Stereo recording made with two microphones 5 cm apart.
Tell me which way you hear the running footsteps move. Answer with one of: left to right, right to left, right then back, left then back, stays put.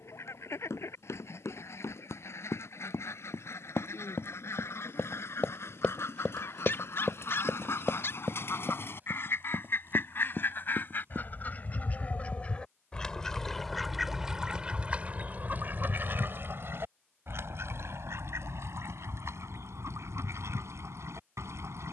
left to right.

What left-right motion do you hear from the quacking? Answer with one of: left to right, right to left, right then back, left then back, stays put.
left to right.